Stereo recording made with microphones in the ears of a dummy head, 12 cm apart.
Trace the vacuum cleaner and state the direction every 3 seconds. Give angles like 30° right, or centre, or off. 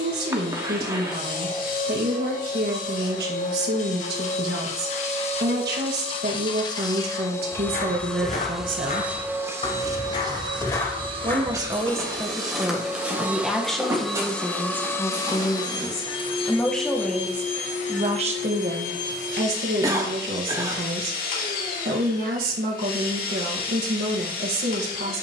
70° left, 50° left, 20° left, 30° right, 10° right, 40° left, 60° left, 70° left, 70° left.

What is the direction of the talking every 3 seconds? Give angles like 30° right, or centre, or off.
80° right, 80° right, 80° right, 30° right, centre, 10° left, 70° right, 80° right, 80° right.